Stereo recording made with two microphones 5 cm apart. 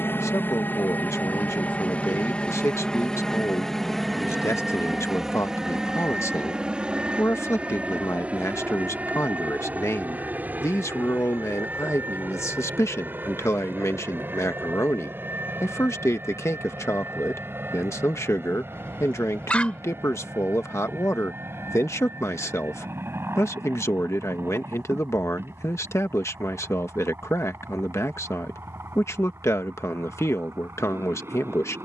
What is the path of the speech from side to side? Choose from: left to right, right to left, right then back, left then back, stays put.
stays put.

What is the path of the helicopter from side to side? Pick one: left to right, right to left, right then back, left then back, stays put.
left to right.